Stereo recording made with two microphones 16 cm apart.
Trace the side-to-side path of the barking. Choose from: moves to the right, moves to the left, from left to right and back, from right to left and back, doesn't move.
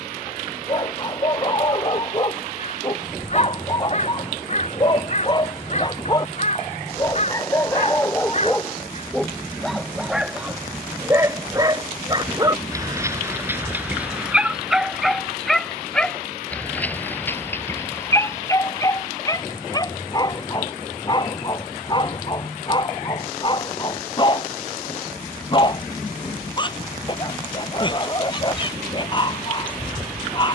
from left to right and back.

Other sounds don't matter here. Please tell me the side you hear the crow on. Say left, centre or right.
left.